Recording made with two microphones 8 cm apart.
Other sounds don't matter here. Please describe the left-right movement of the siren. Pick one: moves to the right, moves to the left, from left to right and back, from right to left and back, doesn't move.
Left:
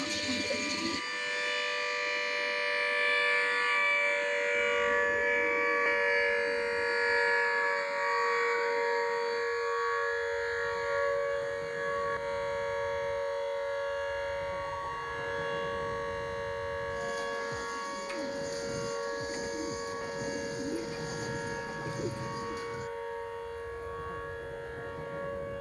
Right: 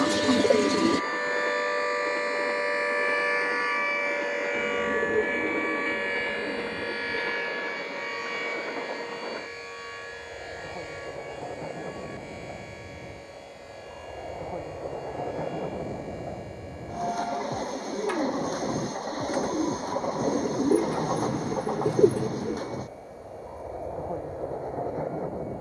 moves to the left.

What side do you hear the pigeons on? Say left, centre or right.
right.